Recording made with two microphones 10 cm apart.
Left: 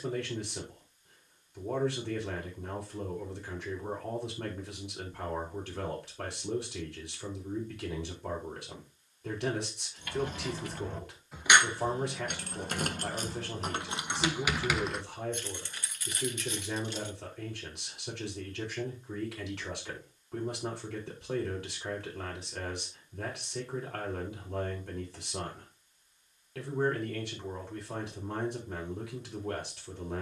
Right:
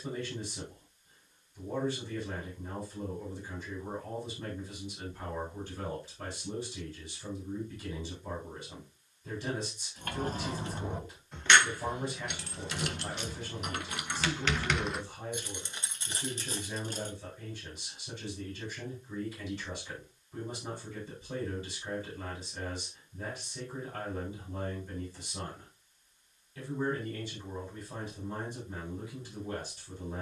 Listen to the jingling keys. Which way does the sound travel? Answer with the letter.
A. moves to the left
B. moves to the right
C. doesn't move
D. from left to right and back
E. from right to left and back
E.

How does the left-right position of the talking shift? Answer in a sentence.
You can hear the talking stay in one place.